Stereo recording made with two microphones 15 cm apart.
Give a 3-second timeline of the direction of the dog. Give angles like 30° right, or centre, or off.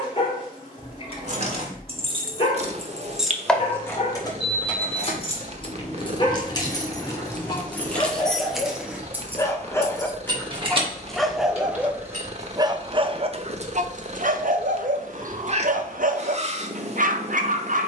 40° left, 40° left, 30° left, 10° left, 40° right, 60° right.